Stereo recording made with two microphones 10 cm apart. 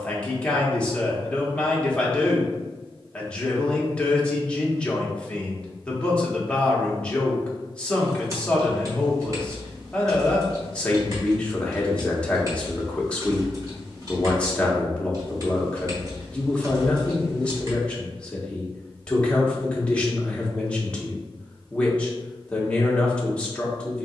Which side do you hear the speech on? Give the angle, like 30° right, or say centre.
10° left.